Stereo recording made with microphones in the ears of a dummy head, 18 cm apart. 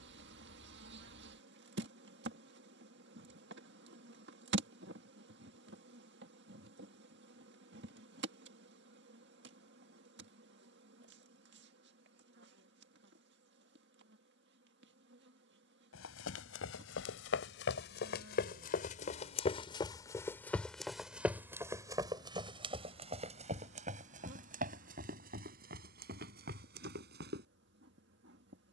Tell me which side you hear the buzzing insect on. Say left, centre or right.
right.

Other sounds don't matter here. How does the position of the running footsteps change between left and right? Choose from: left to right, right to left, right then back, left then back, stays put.
left to right.